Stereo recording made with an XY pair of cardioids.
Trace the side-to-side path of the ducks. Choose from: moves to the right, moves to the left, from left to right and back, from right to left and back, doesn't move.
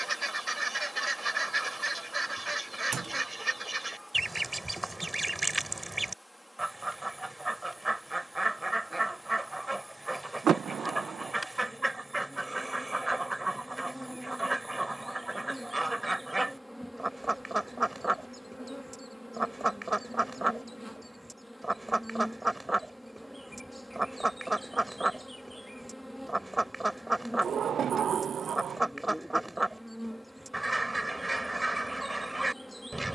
doesn't move.